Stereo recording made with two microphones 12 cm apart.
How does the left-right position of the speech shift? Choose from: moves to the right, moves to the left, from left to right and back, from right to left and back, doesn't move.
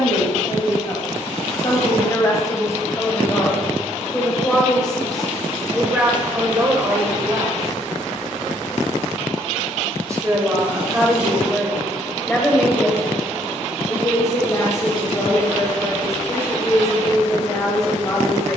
from left to right and back.